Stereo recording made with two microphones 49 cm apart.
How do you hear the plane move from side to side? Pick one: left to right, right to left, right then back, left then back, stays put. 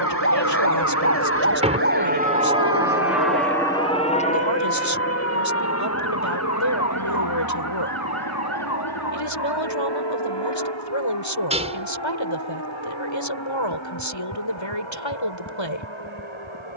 right to left.